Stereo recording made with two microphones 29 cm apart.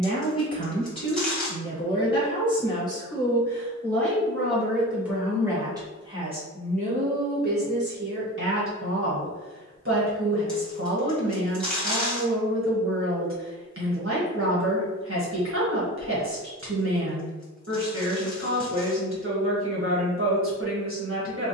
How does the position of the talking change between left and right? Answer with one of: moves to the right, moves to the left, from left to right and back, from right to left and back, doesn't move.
moves to the right.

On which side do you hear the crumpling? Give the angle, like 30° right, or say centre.
centre.